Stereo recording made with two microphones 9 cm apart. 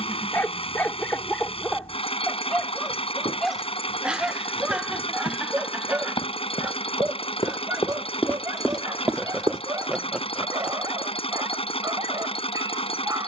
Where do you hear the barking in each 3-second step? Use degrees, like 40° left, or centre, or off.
10° left, 10° right, 30° right, 40° right, 40° right.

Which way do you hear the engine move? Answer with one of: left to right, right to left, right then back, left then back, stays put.
stays put.